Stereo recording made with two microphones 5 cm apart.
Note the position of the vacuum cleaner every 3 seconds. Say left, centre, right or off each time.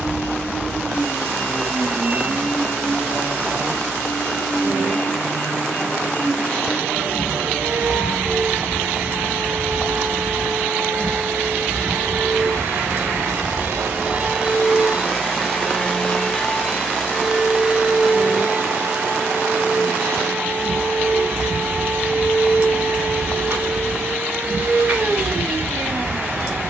right, right, right, right, right, centre, right, right, right.